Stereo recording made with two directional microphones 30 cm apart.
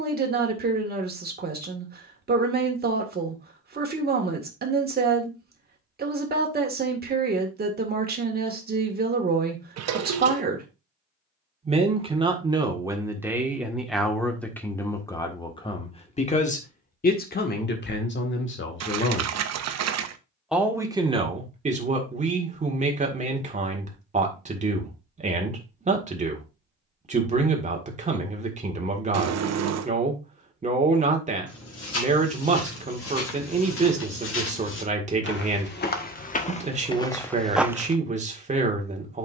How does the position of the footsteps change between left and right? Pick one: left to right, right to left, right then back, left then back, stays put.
left to right.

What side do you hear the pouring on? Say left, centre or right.
right.